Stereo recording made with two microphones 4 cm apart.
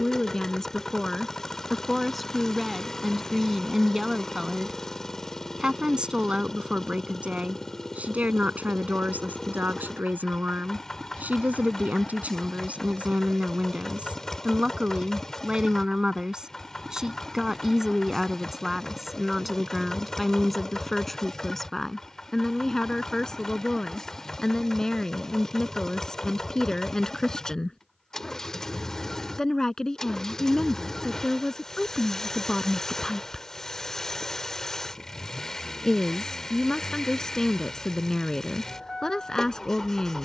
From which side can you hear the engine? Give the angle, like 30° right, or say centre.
10° left.